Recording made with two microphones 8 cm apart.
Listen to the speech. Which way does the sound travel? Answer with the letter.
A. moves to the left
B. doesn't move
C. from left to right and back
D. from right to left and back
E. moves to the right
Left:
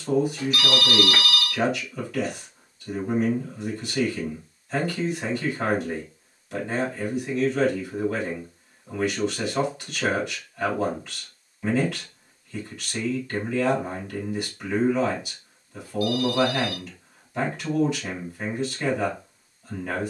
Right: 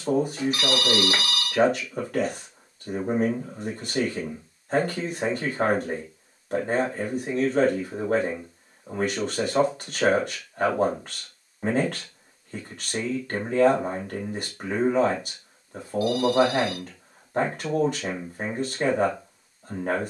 B.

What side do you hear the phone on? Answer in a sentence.
In this clip you hear the phone on the right.